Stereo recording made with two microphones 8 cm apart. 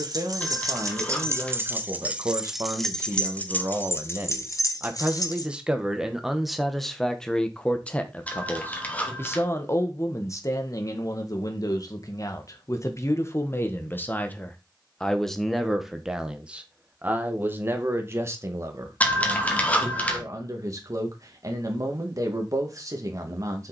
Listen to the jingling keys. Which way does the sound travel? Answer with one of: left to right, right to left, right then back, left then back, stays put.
right to left.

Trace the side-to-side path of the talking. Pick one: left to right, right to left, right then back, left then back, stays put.
left then back.